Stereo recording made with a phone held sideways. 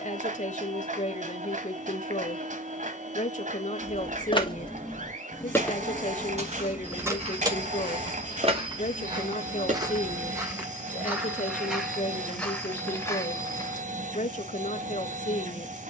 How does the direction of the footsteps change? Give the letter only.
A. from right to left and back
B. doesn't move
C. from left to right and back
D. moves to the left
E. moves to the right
D.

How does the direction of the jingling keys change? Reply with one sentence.
You can hear the jingling keys move from left to right.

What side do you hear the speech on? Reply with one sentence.
In this clip you hear the speech on the left.